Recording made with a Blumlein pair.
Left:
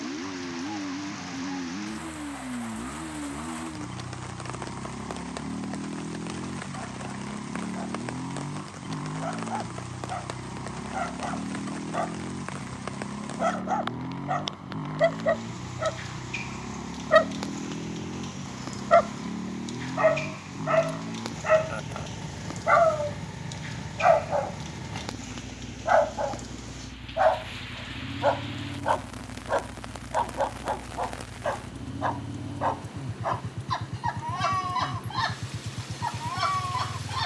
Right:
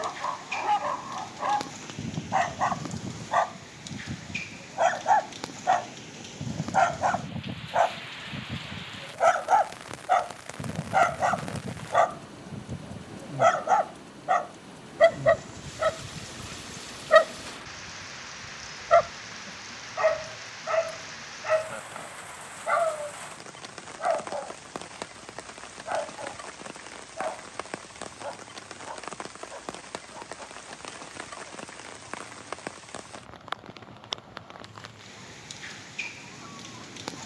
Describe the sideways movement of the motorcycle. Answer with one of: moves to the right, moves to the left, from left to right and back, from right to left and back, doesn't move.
doesn't move.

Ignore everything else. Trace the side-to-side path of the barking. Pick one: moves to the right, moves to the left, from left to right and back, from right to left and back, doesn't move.
moves to the left.